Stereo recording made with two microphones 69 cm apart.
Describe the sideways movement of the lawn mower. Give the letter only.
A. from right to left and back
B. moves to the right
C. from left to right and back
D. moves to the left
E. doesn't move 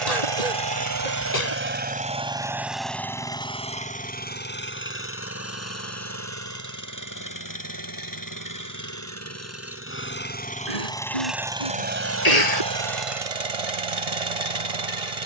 A.